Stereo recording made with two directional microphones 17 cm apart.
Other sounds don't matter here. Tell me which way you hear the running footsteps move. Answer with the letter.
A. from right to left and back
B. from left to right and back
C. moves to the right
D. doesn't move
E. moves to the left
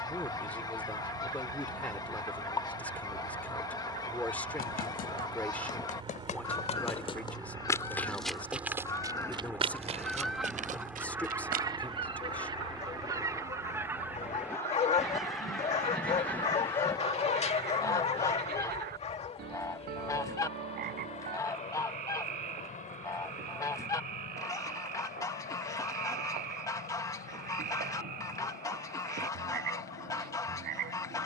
C.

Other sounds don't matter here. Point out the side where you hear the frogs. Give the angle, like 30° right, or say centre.
60° right.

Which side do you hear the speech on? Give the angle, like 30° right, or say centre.
10° left.